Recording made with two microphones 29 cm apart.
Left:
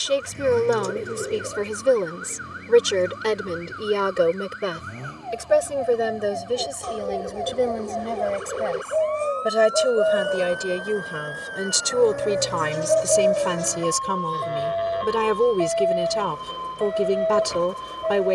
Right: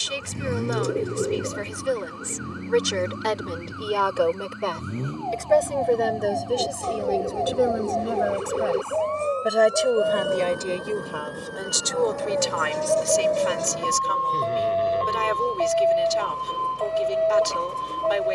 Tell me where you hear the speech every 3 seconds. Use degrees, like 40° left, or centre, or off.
60° left, 20° left, centre, 20° left, 60° left, 60° left.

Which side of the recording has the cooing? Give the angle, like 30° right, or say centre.
30° right.